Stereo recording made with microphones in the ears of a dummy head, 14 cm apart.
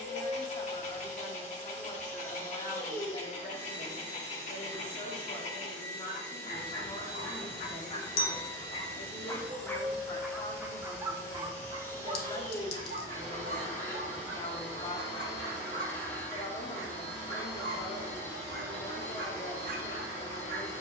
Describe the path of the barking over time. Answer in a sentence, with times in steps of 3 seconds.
In this clip you hear the barking on the left from 0 s, in the centre from 9 s and on the right from 12 s.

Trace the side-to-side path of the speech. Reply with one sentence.
You can hear the speech stay put.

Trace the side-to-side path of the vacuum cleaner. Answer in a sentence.
You can hear the vacuum cleaner stay in one place.